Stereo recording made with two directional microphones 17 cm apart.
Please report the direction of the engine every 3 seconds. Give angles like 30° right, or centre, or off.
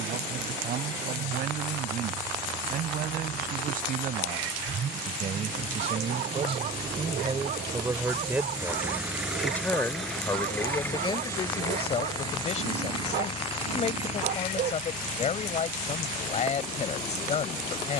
60° right, 50° right, 20° right, 10° left, 30° left, 50° left.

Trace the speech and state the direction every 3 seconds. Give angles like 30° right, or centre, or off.
60° right, 50° right, 20° right, 20° left, 40° left, 40° left.